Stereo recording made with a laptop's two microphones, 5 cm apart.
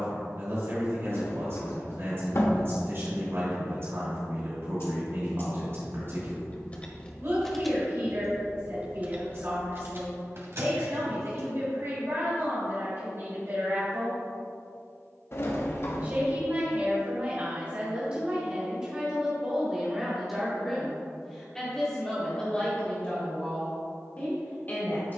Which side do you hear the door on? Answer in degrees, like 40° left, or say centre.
50° left.